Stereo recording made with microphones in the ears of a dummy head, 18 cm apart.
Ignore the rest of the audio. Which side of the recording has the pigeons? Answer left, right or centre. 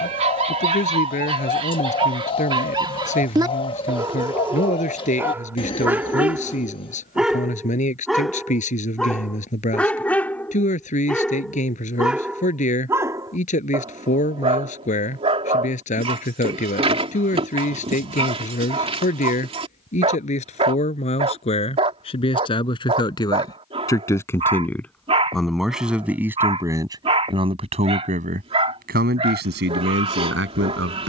left.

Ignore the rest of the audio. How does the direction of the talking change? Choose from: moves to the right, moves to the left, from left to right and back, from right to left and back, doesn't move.
moves to the right.